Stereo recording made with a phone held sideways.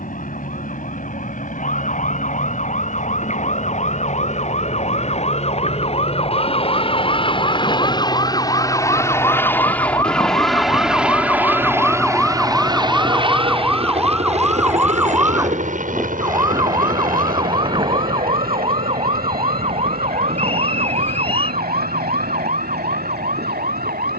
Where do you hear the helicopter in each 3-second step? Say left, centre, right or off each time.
left, left, left, centre, right, right, right, right.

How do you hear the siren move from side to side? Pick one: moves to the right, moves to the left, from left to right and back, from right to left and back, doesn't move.
moves to the right.